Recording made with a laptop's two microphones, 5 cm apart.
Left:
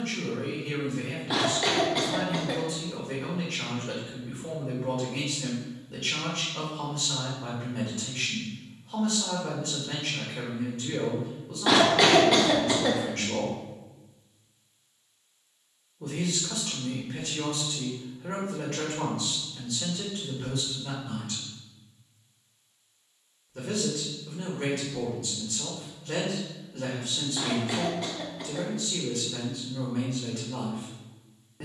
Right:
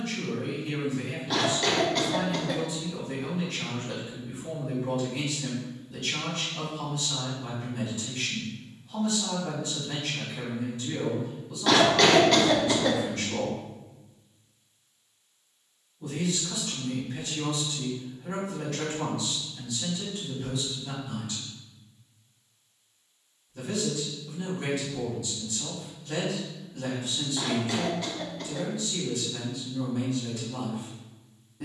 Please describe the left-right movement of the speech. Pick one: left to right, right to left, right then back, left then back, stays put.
stays put.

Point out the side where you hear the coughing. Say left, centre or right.
centre.